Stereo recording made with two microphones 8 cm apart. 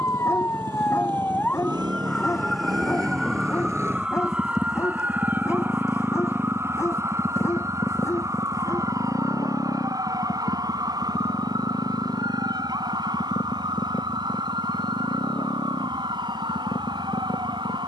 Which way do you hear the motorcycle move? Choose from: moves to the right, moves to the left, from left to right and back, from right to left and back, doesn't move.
moves to the left.